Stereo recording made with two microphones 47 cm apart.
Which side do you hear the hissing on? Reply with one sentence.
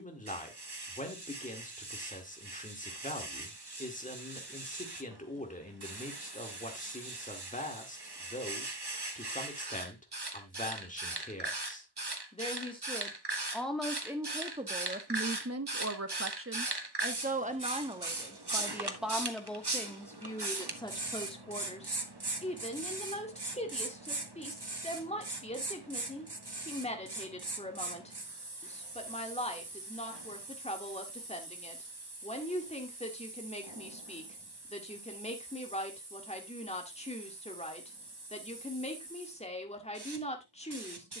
In this clip you hear the hissing on the right.